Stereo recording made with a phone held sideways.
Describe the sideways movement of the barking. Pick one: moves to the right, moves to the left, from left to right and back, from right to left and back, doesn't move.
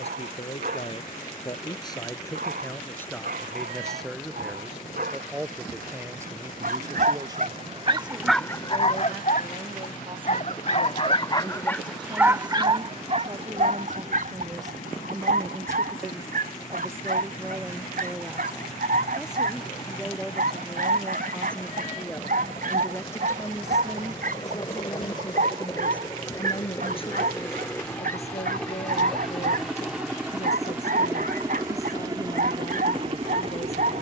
from right to left and back.